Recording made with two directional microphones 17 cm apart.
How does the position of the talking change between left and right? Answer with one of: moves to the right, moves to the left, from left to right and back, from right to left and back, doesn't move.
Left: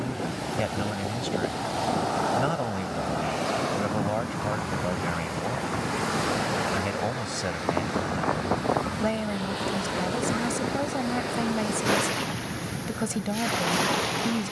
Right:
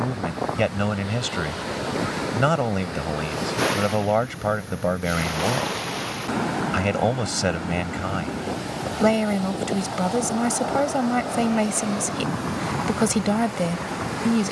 doesn't move.